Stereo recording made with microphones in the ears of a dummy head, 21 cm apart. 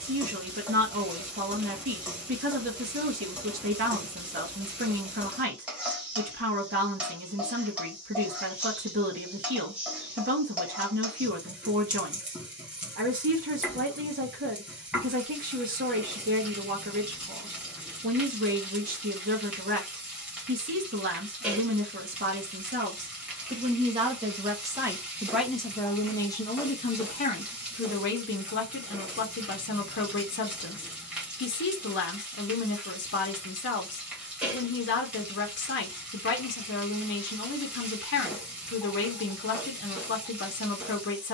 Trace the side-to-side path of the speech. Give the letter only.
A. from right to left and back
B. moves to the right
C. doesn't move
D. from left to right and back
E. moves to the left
E.